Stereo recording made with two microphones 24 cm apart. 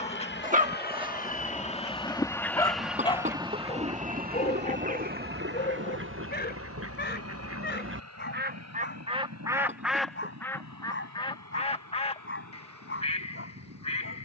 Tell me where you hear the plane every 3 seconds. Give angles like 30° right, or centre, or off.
30° left, 30° right, 60° right, 70° right, 70° right.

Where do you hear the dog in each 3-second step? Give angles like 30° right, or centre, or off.
10° right, 30° left, 40° left, 50° left, 50° left.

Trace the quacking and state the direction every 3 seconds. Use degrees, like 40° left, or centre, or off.
10° left, 30° right, 50° right, 10° left, 20° left.